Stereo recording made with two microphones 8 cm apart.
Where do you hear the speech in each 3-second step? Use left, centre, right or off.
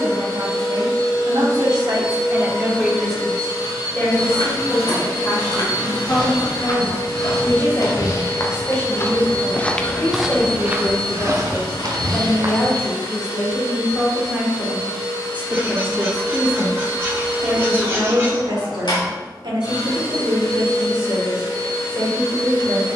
right, left, left, left, centre, right, right, right.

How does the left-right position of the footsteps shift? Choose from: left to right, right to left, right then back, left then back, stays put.
left to right.